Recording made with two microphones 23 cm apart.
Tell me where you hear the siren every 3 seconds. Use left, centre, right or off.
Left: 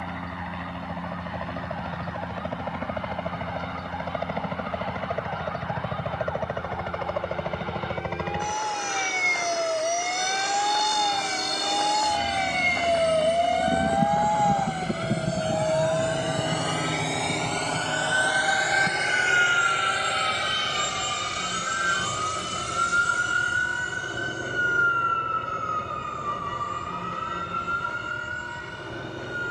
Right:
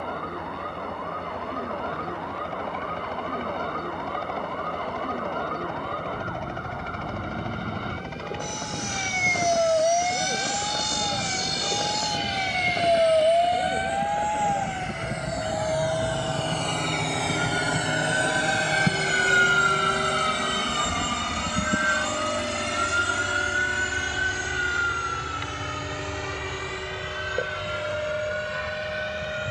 right, right, right, right, right, centre, left, left, left, left.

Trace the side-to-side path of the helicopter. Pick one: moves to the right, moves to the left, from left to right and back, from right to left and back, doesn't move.
moves to the right.